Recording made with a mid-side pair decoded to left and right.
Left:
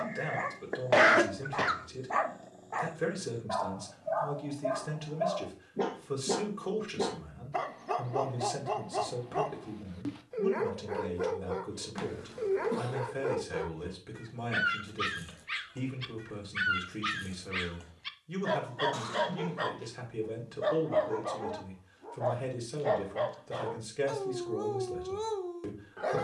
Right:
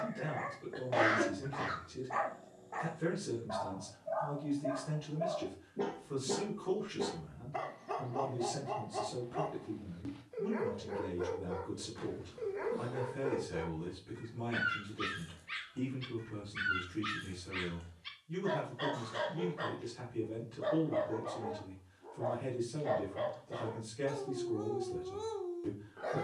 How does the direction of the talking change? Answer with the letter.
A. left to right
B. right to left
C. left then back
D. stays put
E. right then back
D.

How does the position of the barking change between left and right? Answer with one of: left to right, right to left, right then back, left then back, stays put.
stays put.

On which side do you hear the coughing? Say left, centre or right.
left.